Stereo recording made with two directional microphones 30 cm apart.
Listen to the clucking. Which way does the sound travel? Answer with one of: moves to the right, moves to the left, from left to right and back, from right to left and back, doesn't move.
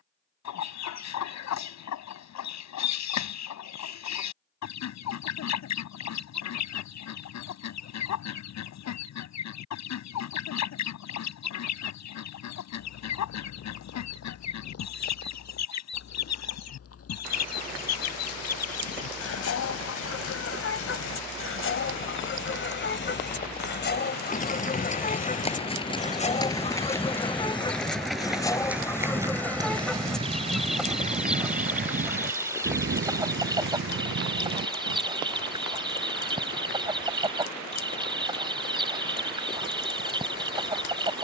moves to the right.